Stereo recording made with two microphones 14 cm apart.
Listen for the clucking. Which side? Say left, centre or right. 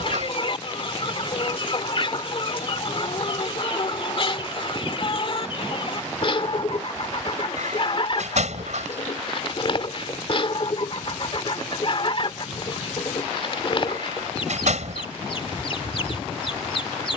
left.